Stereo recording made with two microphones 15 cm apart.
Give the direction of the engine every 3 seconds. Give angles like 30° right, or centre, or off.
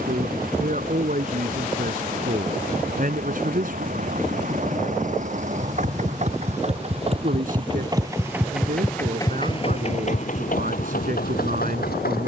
70° right, 60° right, 30° right, 60° left.